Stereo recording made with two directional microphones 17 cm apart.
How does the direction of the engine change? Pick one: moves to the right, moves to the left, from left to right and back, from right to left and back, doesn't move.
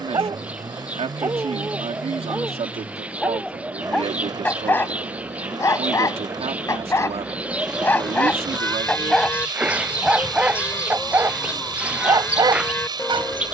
doesn't move.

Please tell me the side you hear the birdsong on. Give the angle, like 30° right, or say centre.
10° right.